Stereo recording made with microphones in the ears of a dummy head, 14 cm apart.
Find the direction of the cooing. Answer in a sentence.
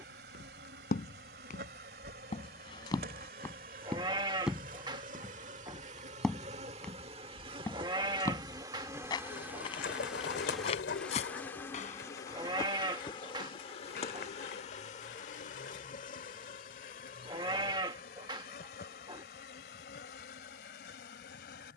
You can hear the cooing on the left.